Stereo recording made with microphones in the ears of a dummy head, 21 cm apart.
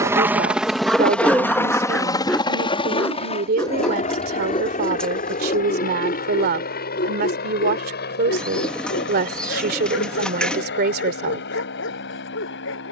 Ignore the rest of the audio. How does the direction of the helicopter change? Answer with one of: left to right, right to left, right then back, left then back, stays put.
right to left.